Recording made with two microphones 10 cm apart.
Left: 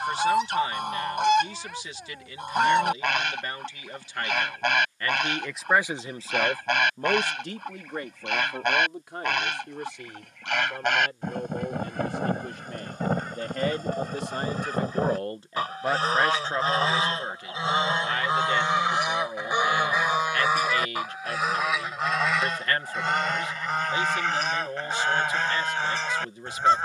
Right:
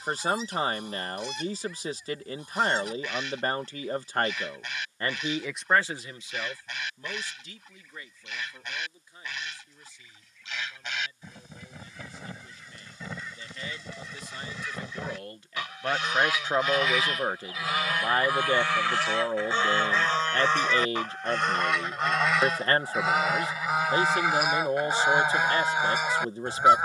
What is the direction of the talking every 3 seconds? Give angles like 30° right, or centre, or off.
40° right, 30° right, 60° left, 80° left, 70° left, 10° right, 30° right, 30° right, 30° right.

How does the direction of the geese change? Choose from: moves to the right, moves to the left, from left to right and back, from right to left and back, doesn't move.
moves to the right.